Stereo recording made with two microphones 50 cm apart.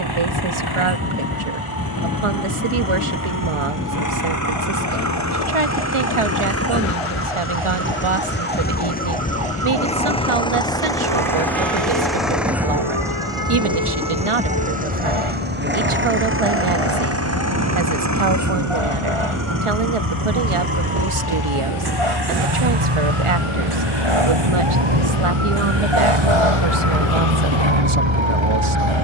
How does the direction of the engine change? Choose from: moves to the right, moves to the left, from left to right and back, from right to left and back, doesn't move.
moves to the right.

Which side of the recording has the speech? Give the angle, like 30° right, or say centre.
80° right.